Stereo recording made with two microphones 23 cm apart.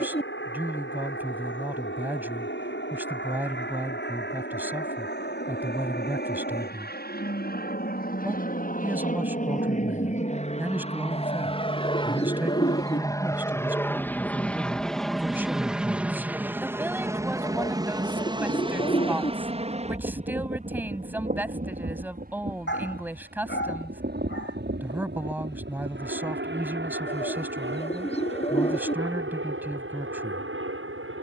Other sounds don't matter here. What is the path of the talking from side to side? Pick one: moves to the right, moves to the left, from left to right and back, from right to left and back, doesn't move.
doesn't move.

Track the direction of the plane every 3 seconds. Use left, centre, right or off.
left, left, left, left, centre, centre, right, right, right, right, right.